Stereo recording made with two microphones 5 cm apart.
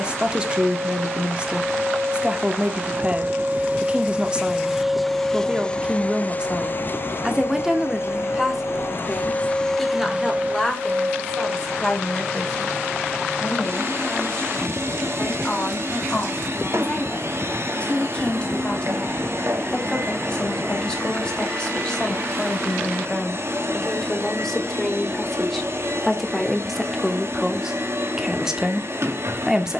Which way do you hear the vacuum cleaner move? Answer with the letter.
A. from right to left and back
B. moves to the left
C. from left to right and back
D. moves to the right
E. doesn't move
A.